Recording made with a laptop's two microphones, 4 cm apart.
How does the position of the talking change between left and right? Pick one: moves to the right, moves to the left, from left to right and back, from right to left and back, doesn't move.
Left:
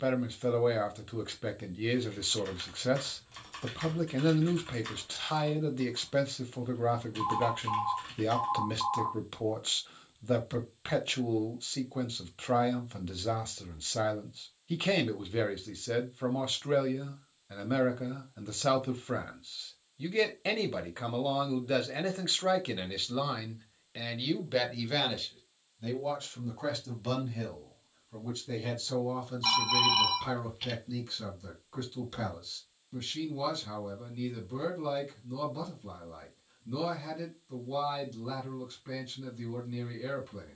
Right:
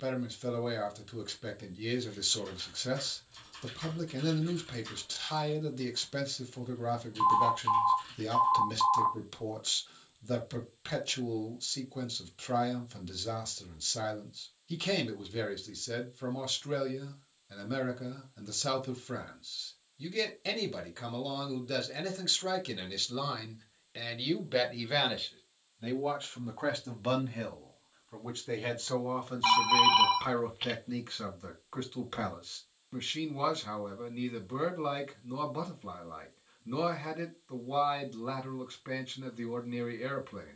moves to the right.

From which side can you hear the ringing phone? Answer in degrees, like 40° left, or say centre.
20° right.